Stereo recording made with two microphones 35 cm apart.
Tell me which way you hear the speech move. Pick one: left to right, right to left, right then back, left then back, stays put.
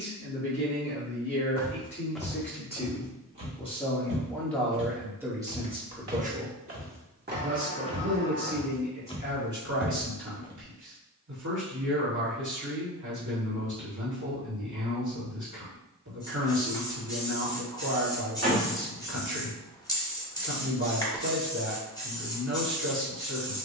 left to right.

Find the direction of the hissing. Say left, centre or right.
centre.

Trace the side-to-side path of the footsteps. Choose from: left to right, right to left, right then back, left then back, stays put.
right then back.